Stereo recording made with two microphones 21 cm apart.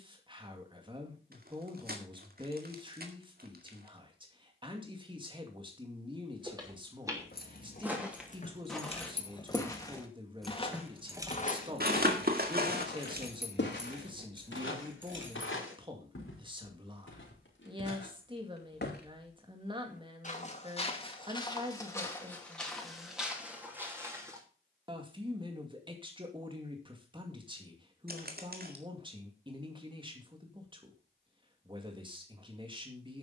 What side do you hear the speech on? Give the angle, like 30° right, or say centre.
20° right.